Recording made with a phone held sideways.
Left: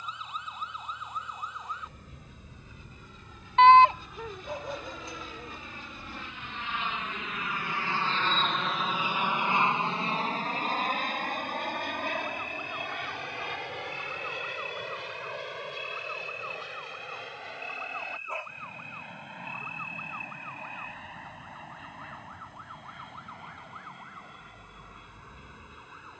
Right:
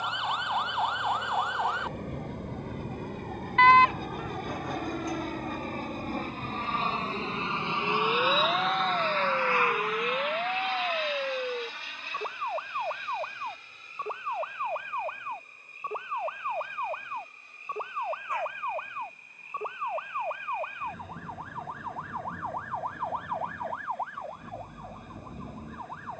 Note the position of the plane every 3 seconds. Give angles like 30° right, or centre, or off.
80° right, 60° right, 30° right, 30° left, 60° left, 70° left, 70° left, 80° left, 80° left.